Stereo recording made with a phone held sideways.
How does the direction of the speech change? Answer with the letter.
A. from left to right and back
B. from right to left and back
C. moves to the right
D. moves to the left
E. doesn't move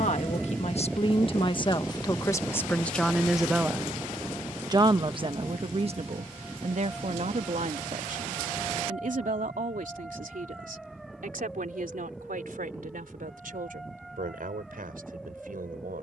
C.